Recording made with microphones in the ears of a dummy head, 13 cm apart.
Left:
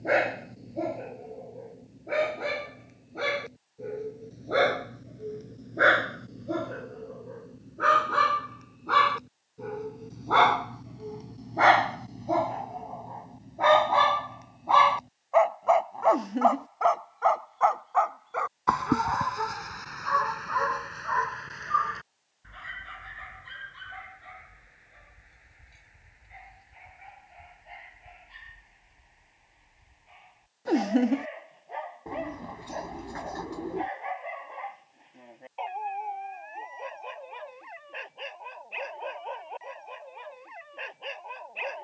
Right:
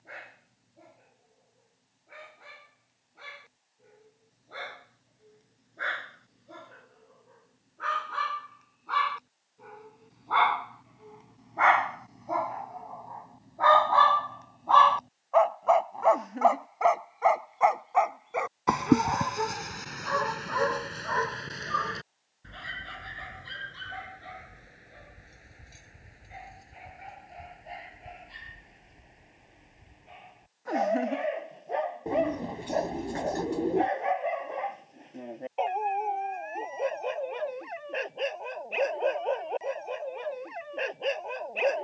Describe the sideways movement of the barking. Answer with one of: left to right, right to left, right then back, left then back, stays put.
left to right.